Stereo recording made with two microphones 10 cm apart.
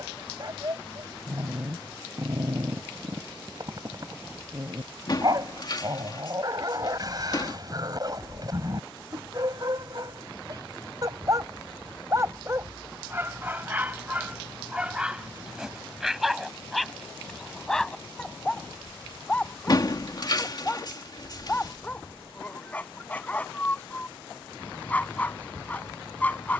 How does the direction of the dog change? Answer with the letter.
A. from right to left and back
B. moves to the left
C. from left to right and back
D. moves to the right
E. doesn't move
B.